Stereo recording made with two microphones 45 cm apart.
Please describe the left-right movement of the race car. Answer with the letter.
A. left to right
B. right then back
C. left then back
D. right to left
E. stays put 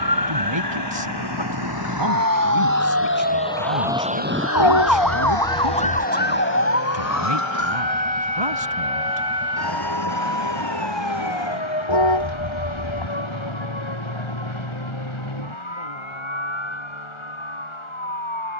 A.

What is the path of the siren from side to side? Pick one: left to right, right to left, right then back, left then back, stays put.
right to left.